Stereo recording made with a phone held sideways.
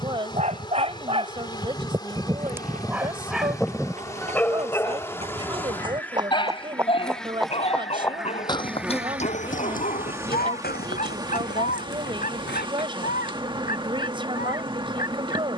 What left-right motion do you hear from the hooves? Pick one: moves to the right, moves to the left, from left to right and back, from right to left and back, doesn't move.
moves to the left.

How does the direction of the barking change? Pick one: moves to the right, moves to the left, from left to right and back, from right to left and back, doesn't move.
moves to the left.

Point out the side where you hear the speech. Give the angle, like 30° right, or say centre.
30° right.